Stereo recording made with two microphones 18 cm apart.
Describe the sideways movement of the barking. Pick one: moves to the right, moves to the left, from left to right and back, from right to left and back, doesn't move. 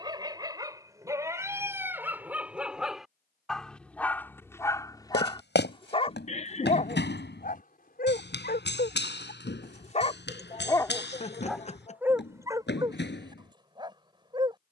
from right to left and back.